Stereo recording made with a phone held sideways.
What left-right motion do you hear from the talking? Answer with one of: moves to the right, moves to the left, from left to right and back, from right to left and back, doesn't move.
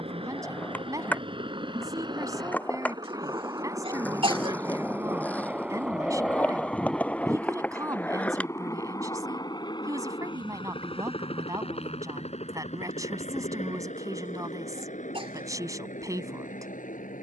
doesn't move.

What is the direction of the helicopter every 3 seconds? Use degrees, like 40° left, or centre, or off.
40° right, 20° right, 10° left, 40° left, 50° left, 60° left.